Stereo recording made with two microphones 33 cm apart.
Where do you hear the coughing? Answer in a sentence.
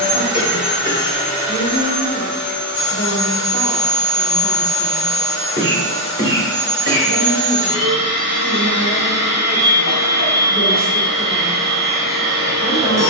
You can hear the coughing on the right.